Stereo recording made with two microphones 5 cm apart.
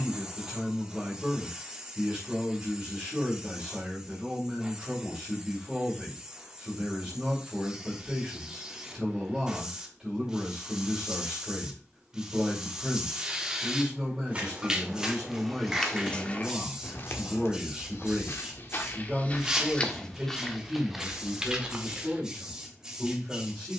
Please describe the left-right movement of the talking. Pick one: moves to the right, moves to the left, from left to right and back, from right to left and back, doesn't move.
doesn't move.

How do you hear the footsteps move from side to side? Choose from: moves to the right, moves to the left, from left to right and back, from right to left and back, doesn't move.
from right to left and back.